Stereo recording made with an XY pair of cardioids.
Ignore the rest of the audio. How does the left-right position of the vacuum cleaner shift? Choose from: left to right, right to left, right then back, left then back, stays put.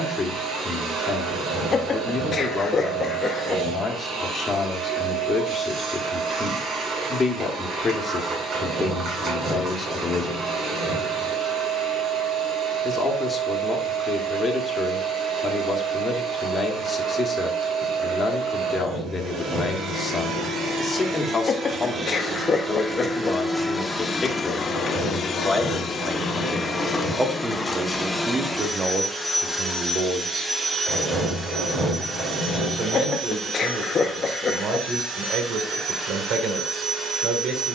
left then back.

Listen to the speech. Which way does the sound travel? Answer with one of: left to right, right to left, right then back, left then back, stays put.
left to right.